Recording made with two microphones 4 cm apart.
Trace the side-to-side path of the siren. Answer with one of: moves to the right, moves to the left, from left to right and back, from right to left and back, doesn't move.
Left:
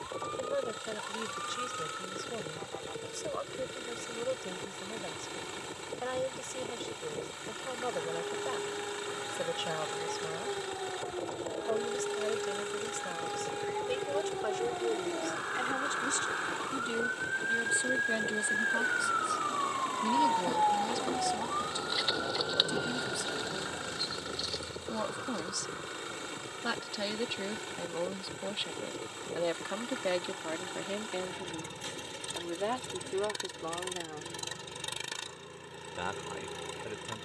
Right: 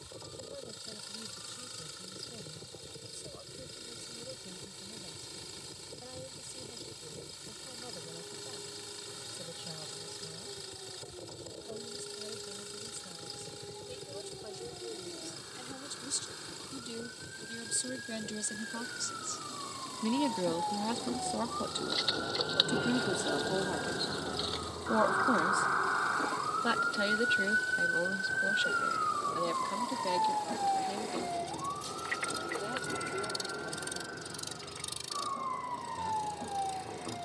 moves to the right.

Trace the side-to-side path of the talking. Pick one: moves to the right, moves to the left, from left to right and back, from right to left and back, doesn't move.
from left to right and back.